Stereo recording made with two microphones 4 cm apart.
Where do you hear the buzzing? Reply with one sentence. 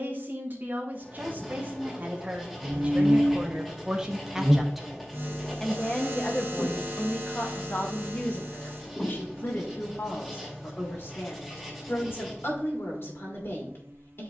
In this clip you hear the buzzing on the right.